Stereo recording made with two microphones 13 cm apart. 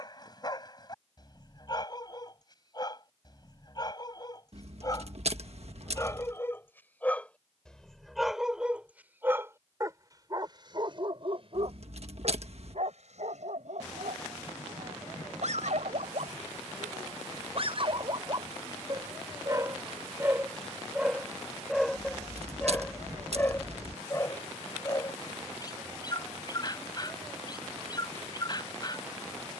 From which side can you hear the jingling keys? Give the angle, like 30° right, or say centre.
60° right.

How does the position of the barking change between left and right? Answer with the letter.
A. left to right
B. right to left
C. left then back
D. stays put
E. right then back
E.